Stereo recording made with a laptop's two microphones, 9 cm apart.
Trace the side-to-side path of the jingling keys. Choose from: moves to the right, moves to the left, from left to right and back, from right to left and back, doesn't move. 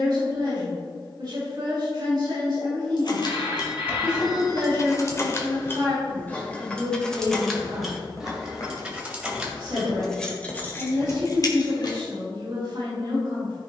from left to right and back.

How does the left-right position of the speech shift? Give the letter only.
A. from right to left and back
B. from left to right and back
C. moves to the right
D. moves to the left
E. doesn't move
E.